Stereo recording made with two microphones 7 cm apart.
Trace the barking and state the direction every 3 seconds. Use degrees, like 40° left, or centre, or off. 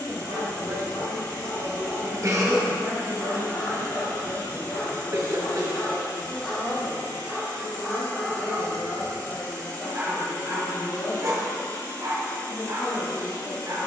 50° left, 30° left, centre, 30° right, 50° right.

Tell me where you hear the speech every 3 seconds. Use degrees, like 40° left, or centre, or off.
40° right, 20° right, 10° left, 30° left, 30° left.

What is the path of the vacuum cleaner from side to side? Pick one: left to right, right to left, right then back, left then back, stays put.
stays put.